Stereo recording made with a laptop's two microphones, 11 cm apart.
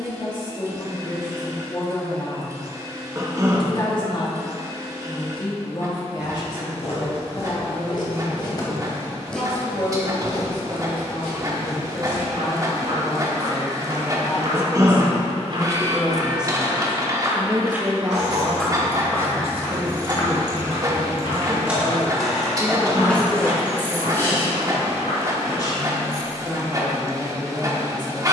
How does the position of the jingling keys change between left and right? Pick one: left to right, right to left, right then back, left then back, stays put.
right to left.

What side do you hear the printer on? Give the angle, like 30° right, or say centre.
30° right.